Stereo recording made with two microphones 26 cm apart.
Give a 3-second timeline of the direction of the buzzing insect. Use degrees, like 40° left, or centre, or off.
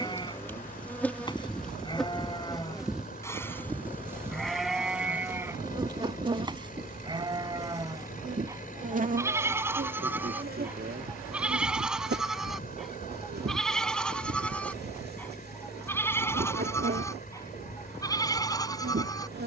centre, 10° right, 20° right, 40° right, 40° right, 40° right, 40° right.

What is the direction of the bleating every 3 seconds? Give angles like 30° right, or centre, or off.
20° left, centre, 20° right, 10° right, centre, 10° left, 10° left.